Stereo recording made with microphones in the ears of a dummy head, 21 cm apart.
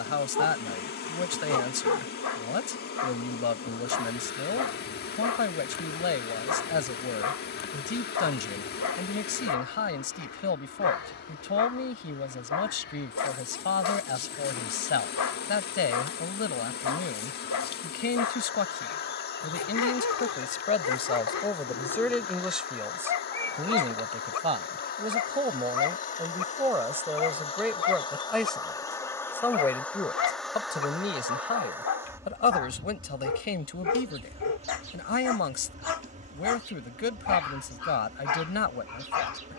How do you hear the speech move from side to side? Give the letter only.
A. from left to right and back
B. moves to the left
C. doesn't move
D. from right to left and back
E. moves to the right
A.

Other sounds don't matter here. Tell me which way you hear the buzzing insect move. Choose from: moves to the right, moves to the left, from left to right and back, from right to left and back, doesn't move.
moves to the right.